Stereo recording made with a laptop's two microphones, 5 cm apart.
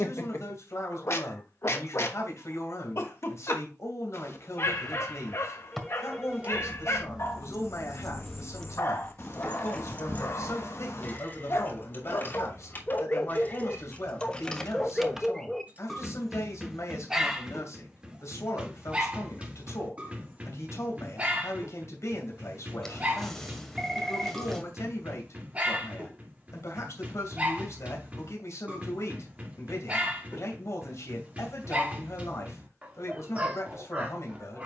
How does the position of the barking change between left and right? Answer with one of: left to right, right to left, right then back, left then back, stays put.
left to right.